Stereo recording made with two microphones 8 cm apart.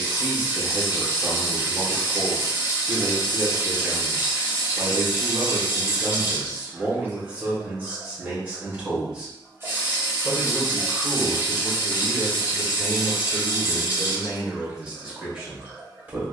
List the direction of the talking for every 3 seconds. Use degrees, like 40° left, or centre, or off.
20° right, 20° right, 20° right, centre, centre, 20° right.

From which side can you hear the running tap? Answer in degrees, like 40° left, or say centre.
30° right.